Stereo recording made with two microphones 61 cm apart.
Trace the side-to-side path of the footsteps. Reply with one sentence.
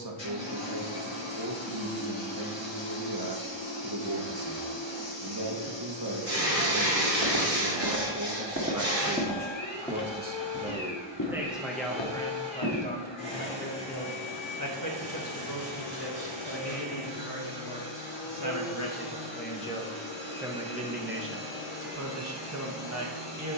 You can hear the footsteps travel towards the left.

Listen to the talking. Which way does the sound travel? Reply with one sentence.
In this clip you hear the talking go left and come back.